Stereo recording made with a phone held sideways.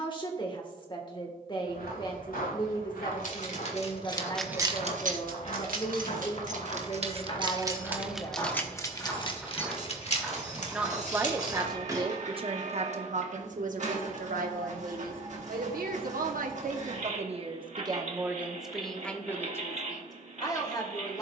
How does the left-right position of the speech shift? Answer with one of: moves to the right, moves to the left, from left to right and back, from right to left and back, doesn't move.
from left to right and back.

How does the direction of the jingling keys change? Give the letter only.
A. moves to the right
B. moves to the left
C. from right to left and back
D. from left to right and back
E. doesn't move
D.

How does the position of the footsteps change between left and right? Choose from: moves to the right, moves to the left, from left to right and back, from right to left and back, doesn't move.
moves to the right.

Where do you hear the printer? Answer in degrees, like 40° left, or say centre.
50° right.